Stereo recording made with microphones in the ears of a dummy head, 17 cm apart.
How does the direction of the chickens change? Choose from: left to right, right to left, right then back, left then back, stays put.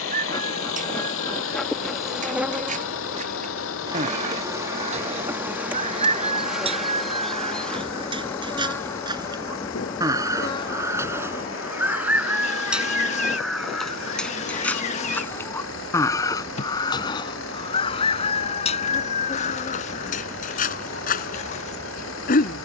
right to left.